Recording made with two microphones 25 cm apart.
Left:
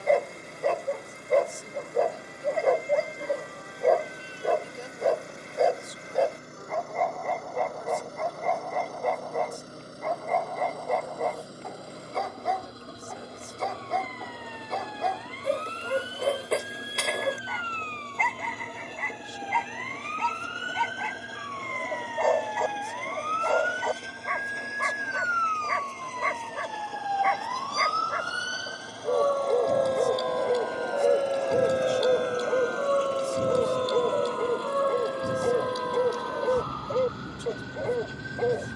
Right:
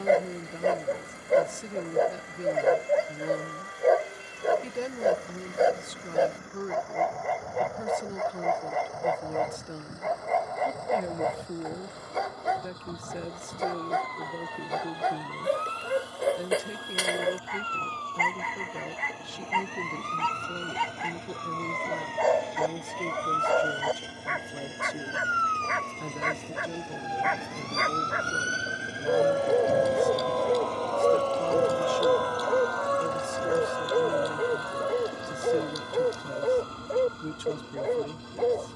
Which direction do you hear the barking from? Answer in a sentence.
You can hear the barking in the centre.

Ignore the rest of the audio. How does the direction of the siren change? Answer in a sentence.
In this clip you hear the siren go from the right side to the left.